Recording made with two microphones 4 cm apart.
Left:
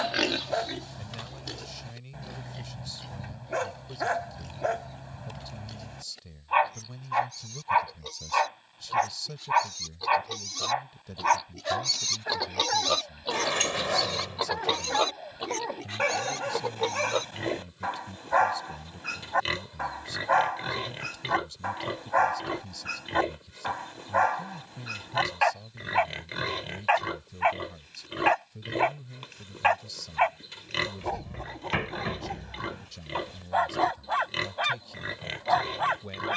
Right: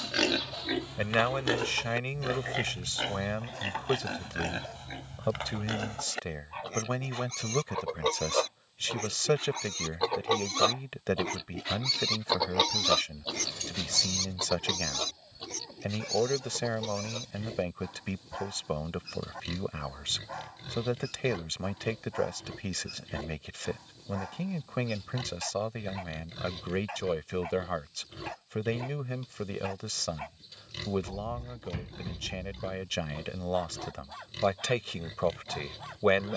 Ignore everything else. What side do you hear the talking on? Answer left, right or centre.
right.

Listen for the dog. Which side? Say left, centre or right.
left.